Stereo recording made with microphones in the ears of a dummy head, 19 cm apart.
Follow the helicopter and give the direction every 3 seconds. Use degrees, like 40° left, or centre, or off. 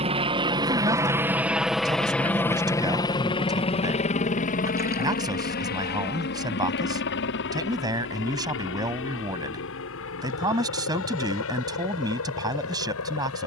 10° right, 40° left, 60° left, 70° left, 70° left.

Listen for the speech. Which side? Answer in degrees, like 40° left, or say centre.
20° right.